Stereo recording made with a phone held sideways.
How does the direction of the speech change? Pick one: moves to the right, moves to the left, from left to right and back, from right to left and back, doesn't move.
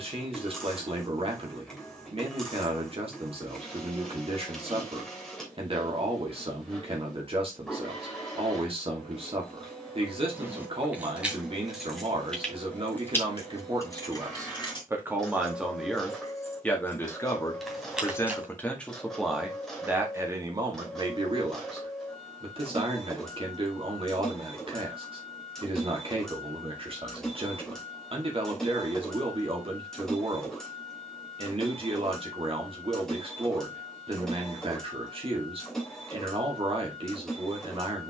from right to left and back.